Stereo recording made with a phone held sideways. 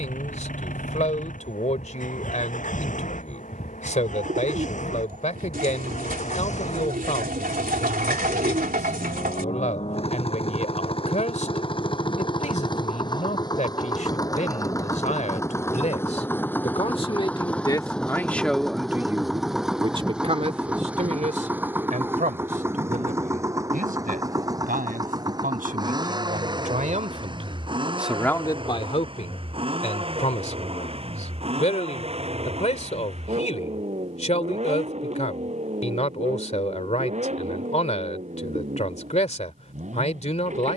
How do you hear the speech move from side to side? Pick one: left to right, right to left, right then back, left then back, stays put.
right then back.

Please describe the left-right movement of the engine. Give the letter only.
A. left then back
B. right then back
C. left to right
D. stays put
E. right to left
C.